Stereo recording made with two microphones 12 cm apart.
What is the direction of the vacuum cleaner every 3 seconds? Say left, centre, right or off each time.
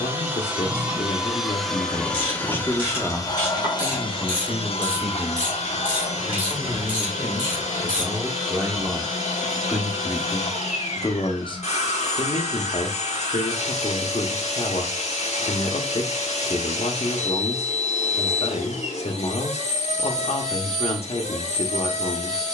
centre, left, left, left, left, left, left, left.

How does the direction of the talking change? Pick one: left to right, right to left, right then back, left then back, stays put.
right then back.